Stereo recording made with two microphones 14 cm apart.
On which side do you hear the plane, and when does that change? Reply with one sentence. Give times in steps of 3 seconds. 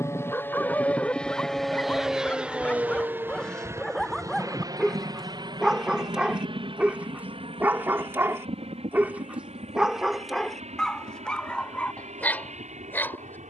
You can hear the plane in the centre from 0 s and on the right from 3 s.